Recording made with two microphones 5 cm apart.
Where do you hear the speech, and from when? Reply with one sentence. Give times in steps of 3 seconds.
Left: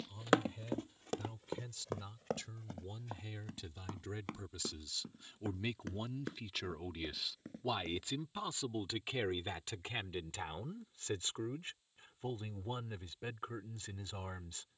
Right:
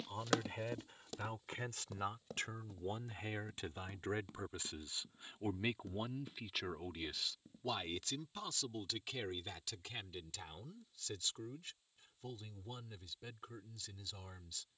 You can hear the speech on the right from 0 s, in the centre from 6 s and on the left from 9 s.